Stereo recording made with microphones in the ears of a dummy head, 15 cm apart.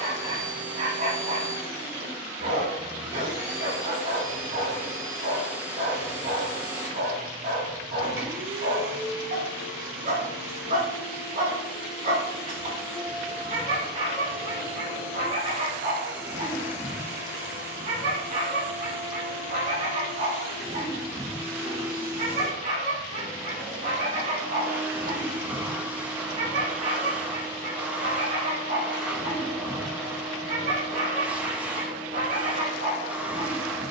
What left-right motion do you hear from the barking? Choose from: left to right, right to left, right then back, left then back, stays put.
stays put.